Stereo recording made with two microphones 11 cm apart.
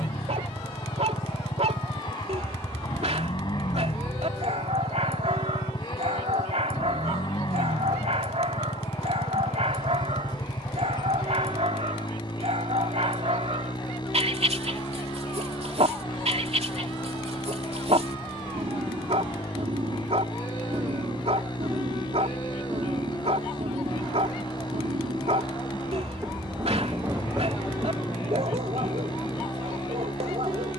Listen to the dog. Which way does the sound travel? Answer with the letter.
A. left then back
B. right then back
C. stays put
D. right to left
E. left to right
C.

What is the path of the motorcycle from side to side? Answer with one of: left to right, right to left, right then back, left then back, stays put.
stays put.